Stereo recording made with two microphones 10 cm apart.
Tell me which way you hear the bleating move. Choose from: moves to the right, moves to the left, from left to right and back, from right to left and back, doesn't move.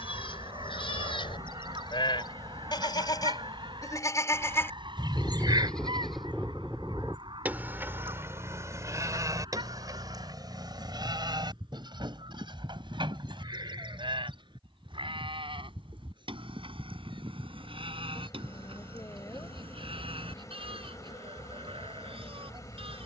moves to the right.